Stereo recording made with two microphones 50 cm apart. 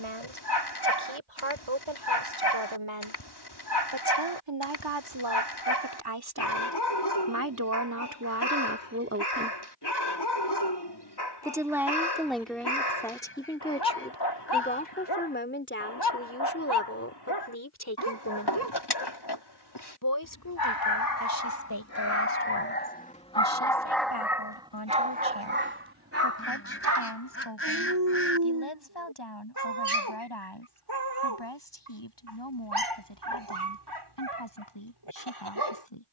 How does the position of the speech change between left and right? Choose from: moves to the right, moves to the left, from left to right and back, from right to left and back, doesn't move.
moves to the left.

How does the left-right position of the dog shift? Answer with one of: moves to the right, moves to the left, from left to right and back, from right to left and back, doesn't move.
moves to the right.